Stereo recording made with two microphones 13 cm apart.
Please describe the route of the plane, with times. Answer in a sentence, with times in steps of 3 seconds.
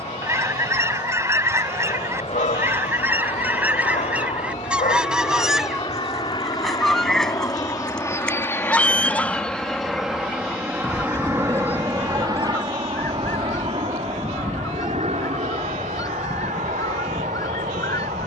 You can hear the plane on the left from 0 s, in the centre from 9 s and on the right from 12 s.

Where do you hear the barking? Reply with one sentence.
You can hear the barking on the left.